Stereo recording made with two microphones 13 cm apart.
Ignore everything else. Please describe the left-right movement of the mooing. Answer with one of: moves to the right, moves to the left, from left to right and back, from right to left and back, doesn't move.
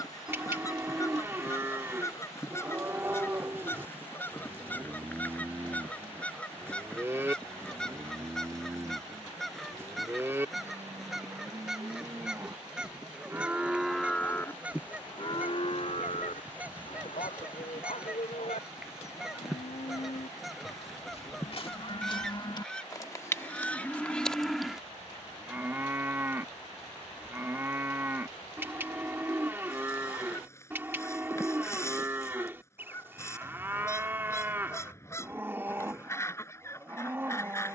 from right to left and back.